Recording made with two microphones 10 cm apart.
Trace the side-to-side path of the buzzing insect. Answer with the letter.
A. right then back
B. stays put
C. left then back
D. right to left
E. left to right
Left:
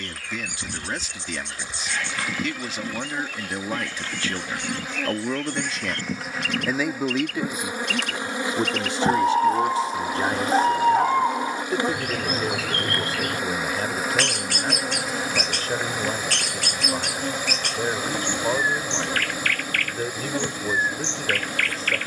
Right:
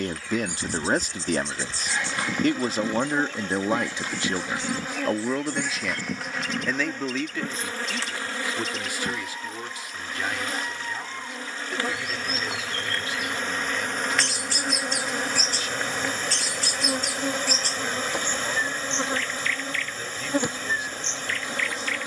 C.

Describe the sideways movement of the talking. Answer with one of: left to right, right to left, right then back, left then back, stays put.
right to left.